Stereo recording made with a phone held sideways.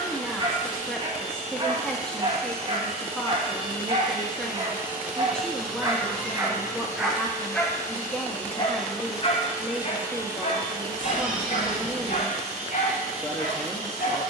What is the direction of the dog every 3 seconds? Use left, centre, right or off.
right, right, centre, left, left.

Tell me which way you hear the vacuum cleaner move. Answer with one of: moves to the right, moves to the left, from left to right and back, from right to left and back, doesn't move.
from right to left and back.